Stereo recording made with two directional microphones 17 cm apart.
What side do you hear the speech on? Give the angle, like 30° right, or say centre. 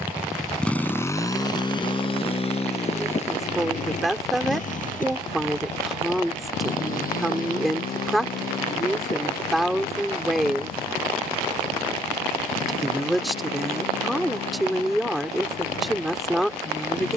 centre.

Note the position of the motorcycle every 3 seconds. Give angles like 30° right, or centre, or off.
20° left, 50° left, 60° left, 60° left, 60° left, 60° left.